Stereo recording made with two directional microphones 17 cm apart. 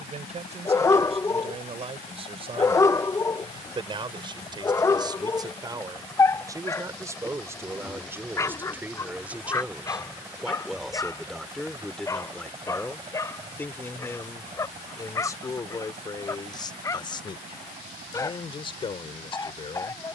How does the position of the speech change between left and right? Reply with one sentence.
In this clip you hear the speech travel towards the left.